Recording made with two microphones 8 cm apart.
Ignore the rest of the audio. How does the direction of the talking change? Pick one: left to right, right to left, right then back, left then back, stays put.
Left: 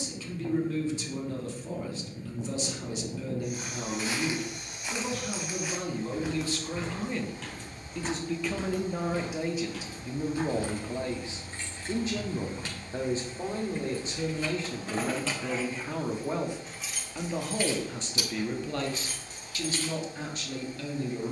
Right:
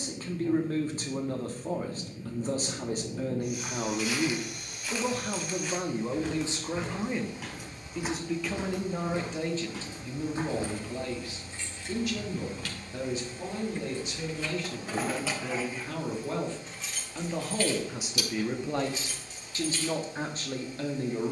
left then back.